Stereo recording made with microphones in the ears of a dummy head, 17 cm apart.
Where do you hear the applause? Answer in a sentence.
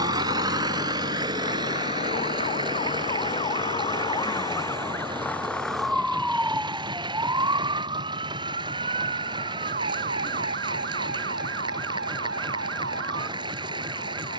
In this clip you hear the applause on the right.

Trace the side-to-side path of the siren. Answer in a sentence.
You can hear the siren move to the right.